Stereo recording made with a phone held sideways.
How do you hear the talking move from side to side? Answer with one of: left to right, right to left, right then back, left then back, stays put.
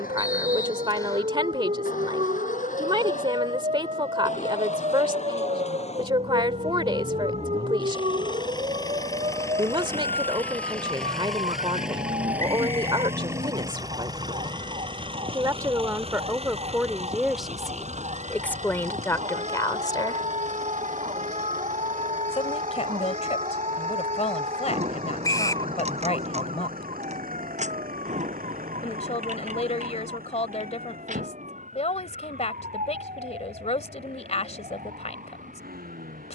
right to left.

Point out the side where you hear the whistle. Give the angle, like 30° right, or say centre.
20° left.